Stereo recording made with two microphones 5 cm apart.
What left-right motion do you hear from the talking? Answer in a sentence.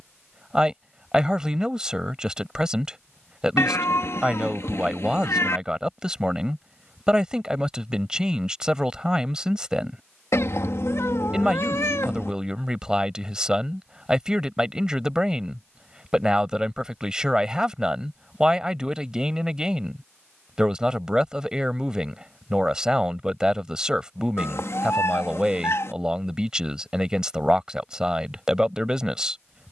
In this clip you hear the talking stay in one place.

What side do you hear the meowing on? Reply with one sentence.
You can hear the meowing on the left.